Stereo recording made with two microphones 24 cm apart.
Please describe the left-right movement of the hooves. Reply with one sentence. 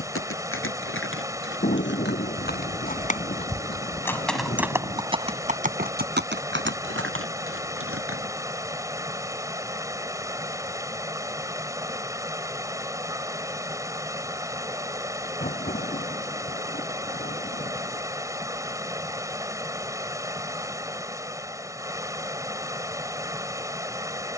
In this clip you hear the hooves travel towards the right.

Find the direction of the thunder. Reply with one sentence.
You can hear the thunder on the left.